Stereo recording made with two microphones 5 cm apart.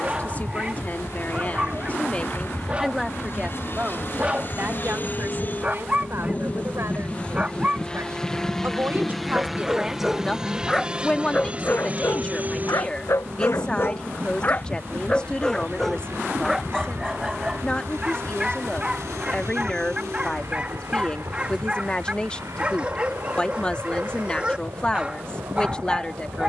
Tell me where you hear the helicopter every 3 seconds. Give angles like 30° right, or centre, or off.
60° left, 50° left, 20° left, 10° right, 40° right, 60° right, 70° right, 70° right, 70° right.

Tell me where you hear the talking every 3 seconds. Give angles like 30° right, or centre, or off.
30° left, 40° right, 60° right, centre, 20° left, 20° left, 20° left, 20° left, 20° left.